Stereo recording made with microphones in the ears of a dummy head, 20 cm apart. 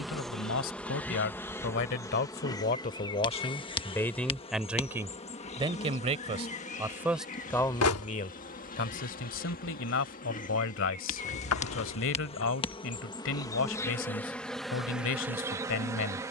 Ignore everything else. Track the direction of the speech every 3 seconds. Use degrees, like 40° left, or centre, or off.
50° left, centre, 10° left, 60° left, 60° left, 60° left.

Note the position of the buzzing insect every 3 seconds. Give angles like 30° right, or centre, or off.
10° left, 30° left, 40° left, 40° left, 20° left, 10° right.